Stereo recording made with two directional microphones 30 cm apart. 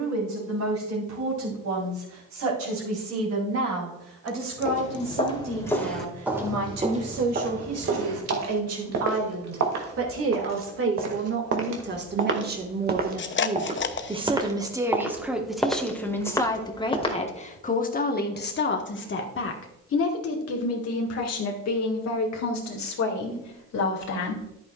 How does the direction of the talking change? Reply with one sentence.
In this clip you hear the talking move from right to left.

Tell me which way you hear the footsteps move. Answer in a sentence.
You can hear the footsteps move from left to right and back again.